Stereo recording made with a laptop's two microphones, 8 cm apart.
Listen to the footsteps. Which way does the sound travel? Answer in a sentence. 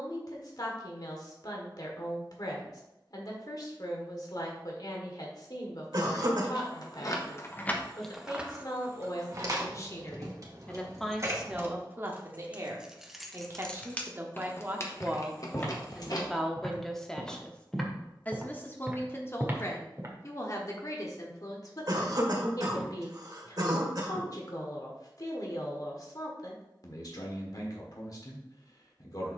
You can hear the footsteps go from the left side to the right.